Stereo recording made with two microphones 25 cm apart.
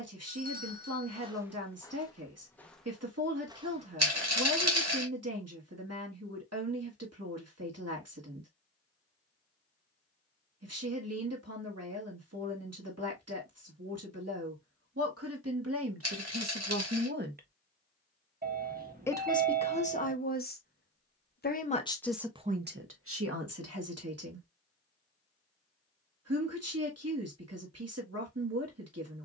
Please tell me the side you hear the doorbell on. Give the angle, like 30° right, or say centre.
40° right.